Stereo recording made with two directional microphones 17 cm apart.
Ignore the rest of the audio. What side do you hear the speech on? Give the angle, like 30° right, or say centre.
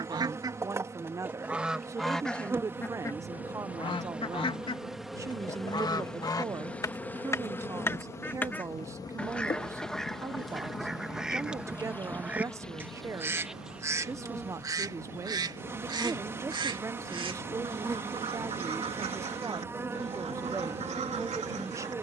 20° right.